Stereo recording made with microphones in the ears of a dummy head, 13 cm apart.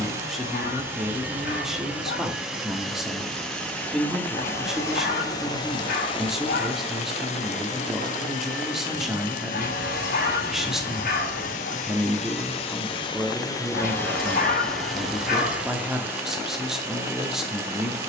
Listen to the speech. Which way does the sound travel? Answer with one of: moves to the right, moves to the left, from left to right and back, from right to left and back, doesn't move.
doesn't move.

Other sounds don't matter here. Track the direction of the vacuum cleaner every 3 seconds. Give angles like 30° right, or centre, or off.
10° right, 20° left, 50° left, 60° left, 30° left, 10° right.